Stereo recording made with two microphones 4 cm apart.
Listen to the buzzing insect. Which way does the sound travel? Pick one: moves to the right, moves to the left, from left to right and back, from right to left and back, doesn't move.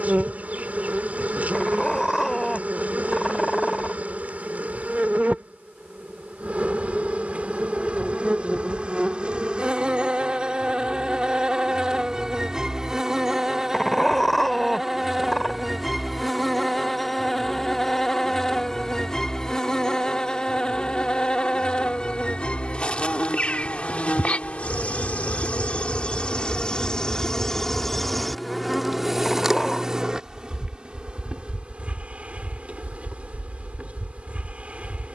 from right to left and back.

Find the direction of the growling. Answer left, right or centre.
centre.